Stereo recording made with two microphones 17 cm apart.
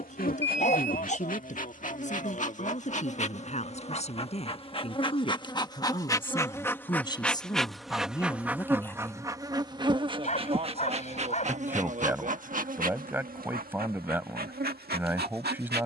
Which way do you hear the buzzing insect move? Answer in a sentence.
You can hear the buzzing insect travel towards the right.